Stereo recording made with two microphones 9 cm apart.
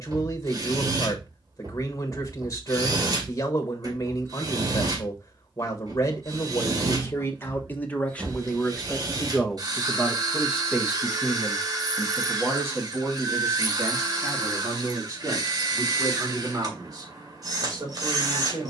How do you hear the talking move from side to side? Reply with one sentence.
You can hear the talking move from left to right.